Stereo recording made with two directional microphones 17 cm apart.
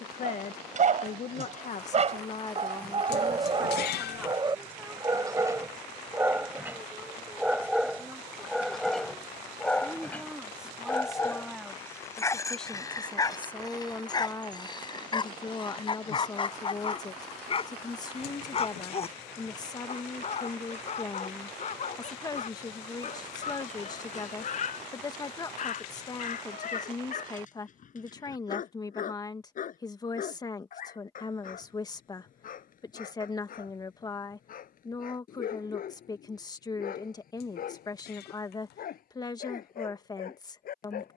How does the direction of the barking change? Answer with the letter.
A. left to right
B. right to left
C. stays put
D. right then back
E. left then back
B.